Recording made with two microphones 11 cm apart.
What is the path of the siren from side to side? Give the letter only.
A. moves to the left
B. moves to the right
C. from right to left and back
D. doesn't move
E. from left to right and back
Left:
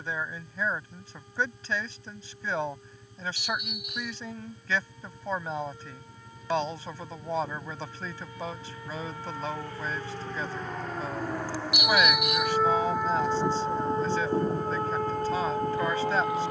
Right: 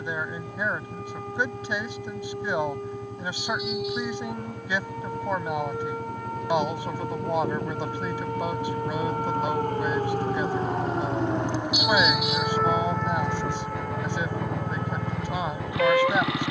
A.